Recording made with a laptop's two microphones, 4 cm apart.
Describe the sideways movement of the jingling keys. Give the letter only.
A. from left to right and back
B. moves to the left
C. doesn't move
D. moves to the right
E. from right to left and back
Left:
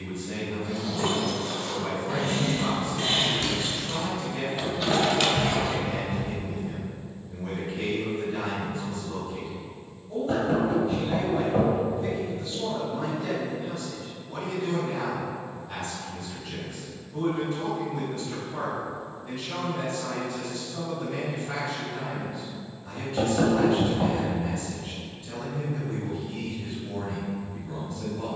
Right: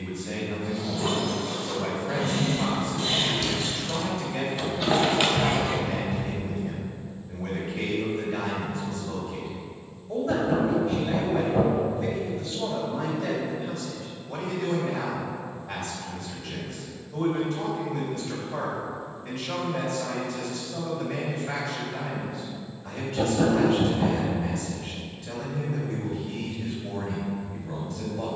D.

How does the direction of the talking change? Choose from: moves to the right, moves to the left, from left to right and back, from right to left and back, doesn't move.
doesn't move.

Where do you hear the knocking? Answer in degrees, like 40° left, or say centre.
40° left.